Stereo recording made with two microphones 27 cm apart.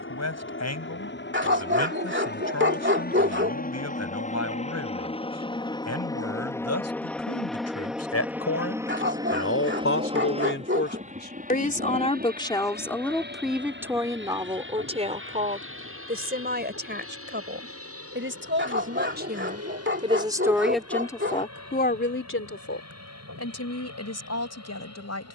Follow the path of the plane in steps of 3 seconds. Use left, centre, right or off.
left, left, centre, right, right, right, right, right, right.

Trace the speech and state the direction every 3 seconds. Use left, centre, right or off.
left, left, left, left, centre, right, right, left, left.